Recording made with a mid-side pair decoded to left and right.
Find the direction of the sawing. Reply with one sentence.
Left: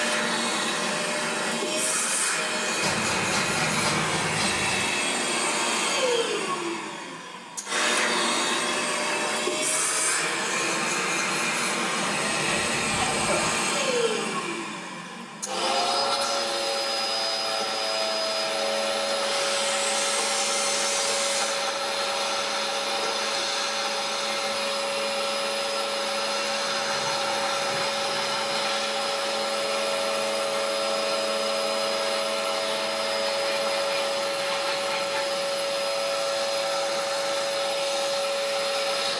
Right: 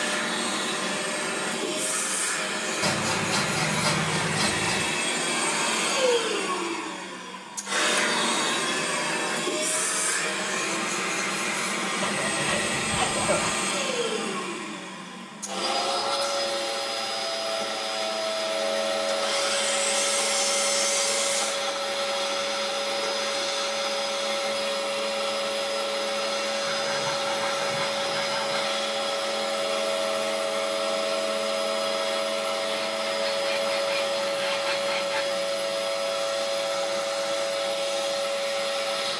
You can hear the sawing on the right.